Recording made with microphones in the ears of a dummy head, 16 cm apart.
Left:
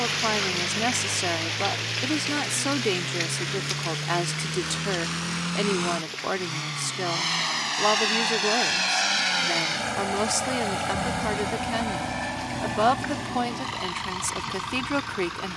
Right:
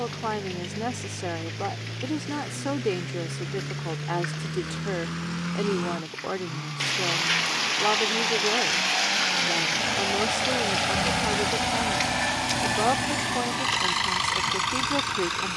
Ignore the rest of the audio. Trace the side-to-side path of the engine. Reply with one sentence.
You can hear the engine move from left to right.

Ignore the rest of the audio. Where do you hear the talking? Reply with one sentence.
In this clip you hear the talking on the left.